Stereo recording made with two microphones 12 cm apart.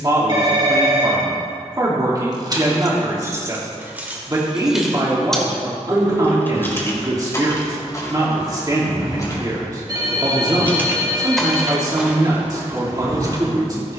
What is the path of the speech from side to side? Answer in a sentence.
You can hear the speech stay in one place.